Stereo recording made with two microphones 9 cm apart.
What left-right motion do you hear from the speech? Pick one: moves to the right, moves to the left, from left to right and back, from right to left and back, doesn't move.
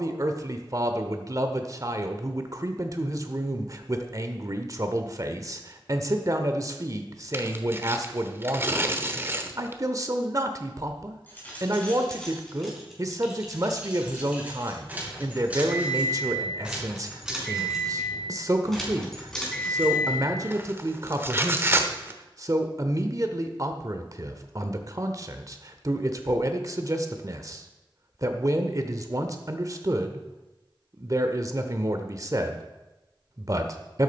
doesn't move.